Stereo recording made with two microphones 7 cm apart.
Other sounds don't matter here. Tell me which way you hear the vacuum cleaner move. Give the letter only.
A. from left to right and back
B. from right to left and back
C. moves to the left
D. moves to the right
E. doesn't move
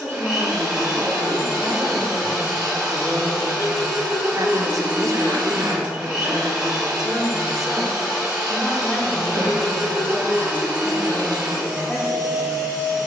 E.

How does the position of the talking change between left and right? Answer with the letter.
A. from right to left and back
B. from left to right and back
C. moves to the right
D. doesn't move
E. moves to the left
B.